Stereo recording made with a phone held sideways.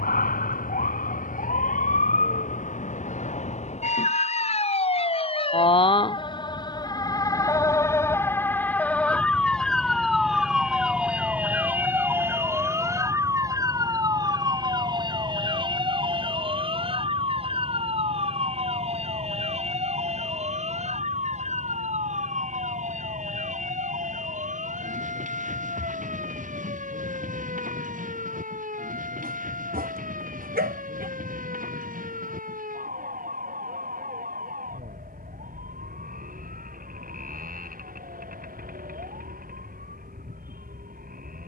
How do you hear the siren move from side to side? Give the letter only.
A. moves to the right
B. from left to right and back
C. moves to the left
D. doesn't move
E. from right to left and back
A.